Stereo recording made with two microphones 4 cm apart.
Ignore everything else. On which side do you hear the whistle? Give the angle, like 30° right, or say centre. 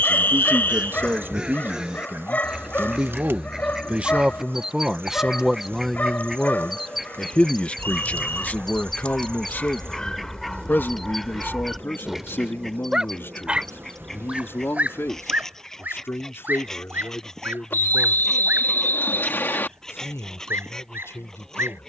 50° left.